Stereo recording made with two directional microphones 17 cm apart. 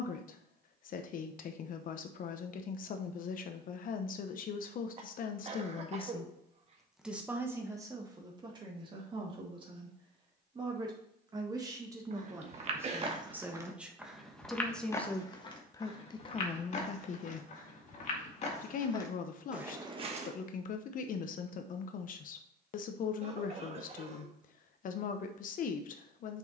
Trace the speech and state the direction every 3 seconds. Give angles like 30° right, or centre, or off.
50° left, 50° left, 10° right, 30° right, 10° right, 30° left, 50° left, 50° left, 50° left.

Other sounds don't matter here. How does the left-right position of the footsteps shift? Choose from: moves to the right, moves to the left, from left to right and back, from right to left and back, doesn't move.
from right to left and back.